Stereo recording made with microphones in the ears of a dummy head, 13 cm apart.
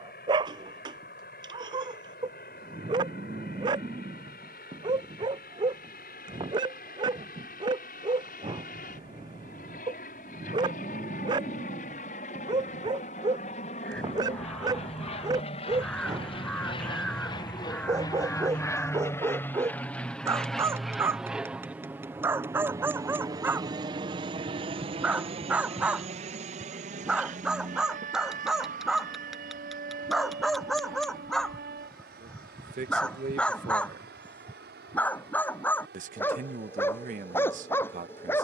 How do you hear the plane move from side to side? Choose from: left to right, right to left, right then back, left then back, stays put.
left to right.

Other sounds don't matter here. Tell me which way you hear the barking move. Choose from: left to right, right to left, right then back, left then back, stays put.
right to left.